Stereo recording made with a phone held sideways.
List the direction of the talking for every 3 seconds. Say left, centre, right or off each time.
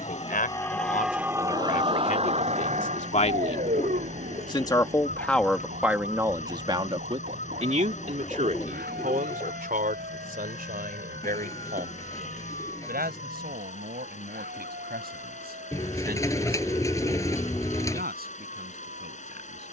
left, left, right, right, right, right, right.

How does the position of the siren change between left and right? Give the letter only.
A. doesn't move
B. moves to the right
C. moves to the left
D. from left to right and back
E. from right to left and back
B.